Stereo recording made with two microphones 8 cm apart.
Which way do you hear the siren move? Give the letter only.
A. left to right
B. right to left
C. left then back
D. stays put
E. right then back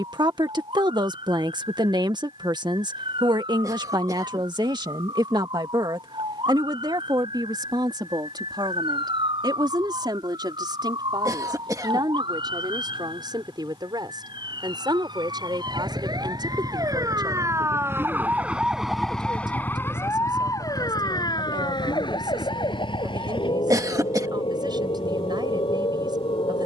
B.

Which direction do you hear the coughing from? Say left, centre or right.
right.